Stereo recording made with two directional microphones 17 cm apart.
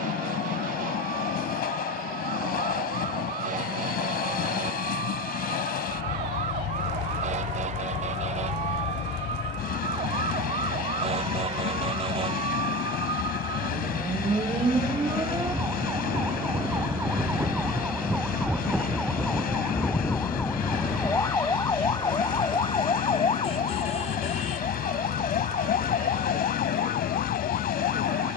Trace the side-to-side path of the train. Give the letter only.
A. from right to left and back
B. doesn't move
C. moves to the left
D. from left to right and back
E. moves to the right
B.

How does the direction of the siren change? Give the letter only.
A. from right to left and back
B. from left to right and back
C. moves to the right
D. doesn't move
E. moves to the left
E.